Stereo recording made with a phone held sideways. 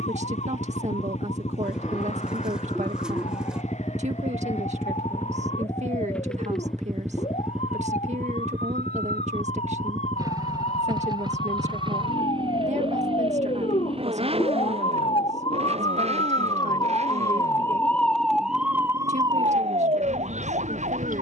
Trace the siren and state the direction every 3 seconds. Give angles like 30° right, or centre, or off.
60° left, 60° left, 60° left, 60° left, 50° left, 30° left, 30° right.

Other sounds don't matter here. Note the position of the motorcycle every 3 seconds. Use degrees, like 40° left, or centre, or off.
50° left, 20° left, centre, 30° right, 40° right, 50° right, 60° right.